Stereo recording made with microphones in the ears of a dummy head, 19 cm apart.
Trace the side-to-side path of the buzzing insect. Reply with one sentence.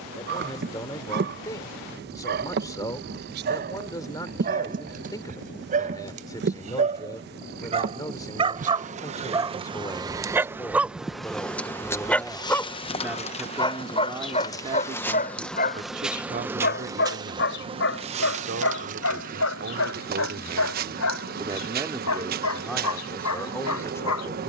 You can hear the buzzing insect move from right to left and back again.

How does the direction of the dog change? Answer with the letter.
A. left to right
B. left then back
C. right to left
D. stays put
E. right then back
C.